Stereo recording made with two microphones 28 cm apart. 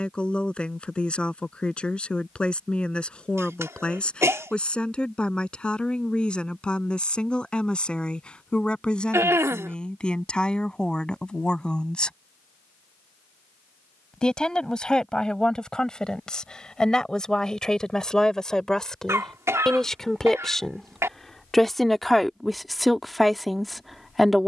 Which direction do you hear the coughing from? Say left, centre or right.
centre.